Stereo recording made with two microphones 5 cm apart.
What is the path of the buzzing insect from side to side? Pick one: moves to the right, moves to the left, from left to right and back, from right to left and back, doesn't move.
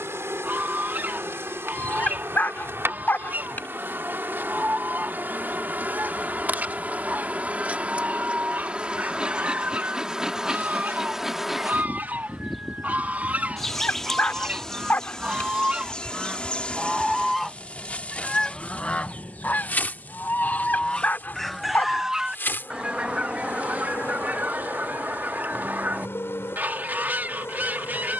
moves to the left.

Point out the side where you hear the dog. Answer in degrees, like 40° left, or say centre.
30° left.